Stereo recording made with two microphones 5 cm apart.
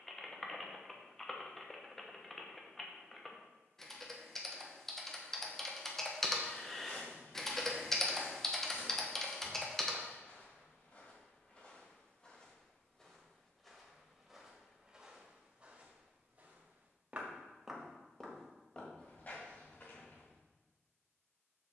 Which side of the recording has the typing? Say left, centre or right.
centre.